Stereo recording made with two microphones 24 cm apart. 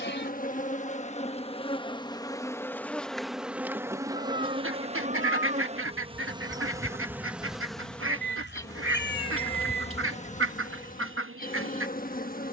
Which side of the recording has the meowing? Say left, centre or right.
left.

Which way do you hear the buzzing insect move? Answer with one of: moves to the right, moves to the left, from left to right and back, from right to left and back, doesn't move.
from left to right and back.